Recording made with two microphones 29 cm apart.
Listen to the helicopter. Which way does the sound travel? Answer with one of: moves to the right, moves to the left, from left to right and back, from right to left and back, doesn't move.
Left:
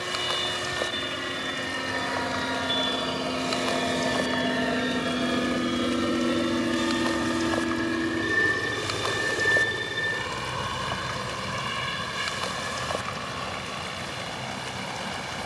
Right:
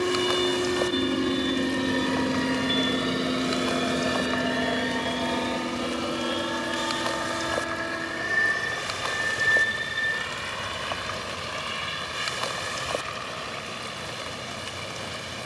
moves to the left.